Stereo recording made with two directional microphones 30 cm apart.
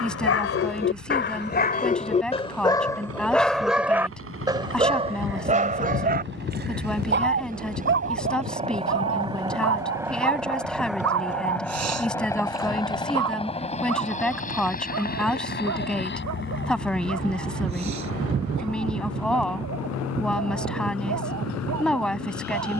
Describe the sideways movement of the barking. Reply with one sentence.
In this clip you hear the barking move to the right.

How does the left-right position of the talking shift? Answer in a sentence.
You can hear the talking stay put.